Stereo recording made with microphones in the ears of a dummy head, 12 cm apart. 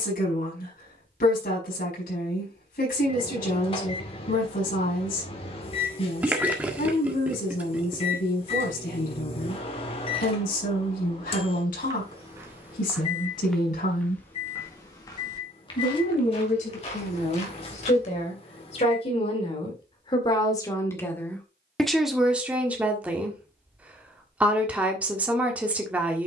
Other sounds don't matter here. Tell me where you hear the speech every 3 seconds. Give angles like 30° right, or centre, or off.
70° left, 70° left, 70° left, 70° left, 70° left, 60° left, 40° left, centre, 10° right.